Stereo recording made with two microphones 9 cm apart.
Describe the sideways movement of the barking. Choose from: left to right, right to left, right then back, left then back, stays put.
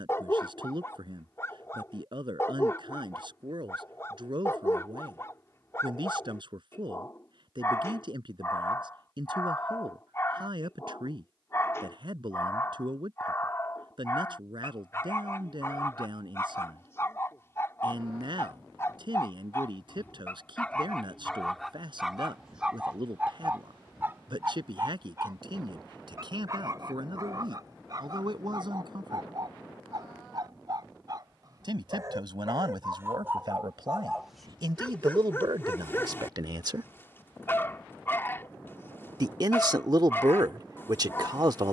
right then back.